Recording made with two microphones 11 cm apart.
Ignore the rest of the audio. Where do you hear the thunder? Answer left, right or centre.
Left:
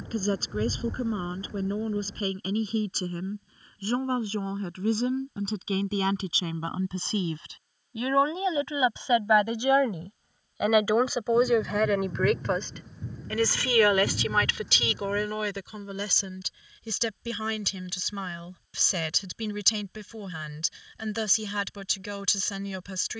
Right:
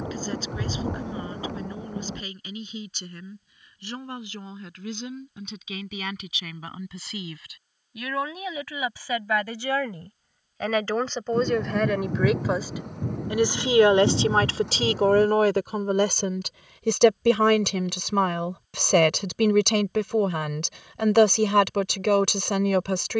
right.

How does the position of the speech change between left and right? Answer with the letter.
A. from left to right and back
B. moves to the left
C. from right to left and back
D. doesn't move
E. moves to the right
E.